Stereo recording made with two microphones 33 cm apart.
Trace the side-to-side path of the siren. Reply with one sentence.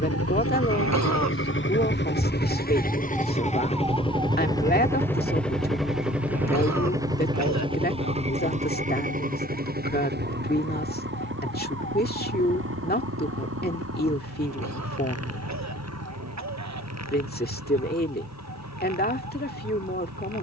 In this clip you hear the siren move from left to right.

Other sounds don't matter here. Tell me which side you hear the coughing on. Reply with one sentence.
In this clip you hear the coughing on the right.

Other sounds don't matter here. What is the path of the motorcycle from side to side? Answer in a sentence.
In this clip you hear the motorcycle go from the left side to the right.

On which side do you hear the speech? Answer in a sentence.
In this clip you hear the speech on the left.